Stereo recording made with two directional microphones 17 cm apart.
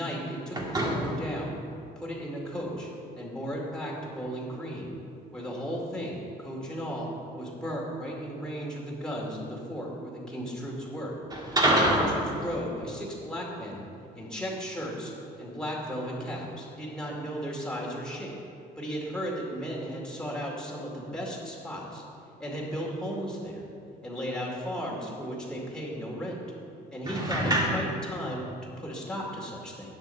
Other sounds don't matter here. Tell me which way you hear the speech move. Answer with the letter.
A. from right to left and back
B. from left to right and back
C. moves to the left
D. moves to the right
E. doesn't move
E.